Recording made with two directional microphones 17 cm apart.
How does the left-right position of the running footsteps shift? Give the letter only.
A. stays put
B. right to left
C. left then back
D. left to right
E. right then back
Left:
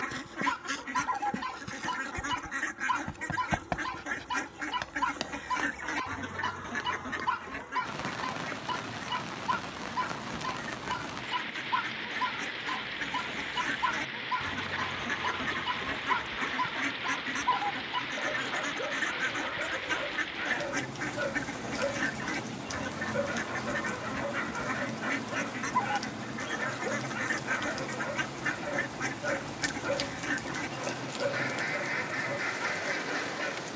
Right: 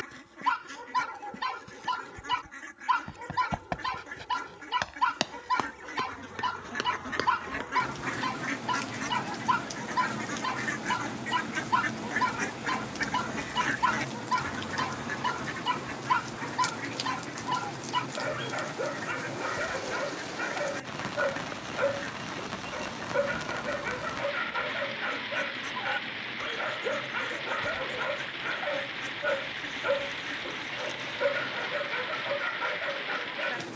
D.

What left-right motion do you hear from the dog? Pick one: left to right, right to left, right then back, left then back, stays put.
stays put.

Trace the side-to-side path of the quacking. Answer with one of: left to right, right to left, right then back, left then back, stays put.
right then back.